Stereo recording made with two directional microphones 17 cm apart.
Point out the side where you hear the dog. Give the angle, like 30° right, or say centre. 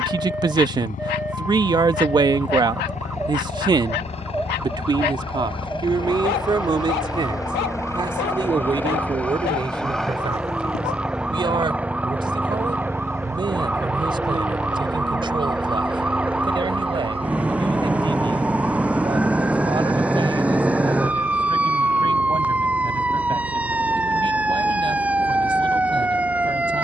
70° left.